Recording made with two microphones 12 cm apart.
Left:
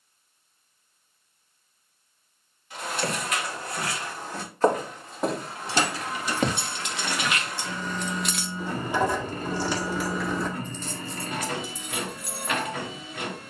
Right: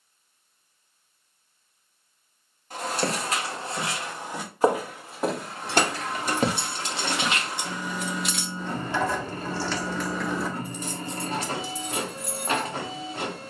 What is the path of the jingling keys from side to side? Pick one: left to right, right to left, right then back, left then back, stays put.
left then back.